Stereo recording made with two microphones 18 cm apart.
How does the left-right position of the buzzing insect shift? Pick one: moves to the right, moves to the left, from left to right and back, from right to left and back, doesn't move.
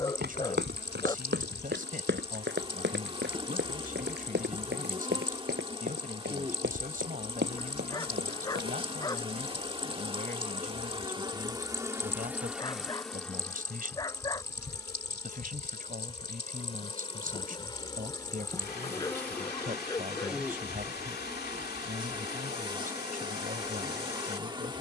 from right to left and back.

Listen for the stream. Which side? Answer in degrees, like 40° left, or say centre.
70° left.